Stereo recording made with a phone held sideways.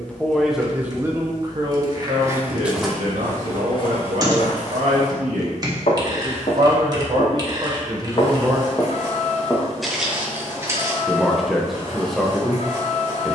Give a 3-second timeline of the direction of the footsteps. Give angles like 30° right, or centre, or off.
20° right, 40° left, 50° left, 10° right, off.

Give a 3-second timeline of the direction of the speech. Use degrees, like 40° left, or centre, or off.
30° right, 60° right, 30° right, centre, centre.